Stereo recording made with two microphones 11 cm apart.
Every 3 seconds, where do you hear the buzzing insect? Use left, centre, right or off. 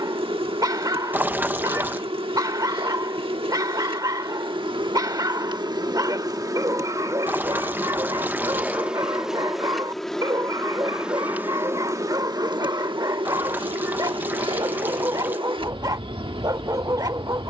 right, right, right, centre, right, right.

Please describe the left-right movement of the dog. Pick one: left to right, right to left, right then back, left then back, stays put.
stays put.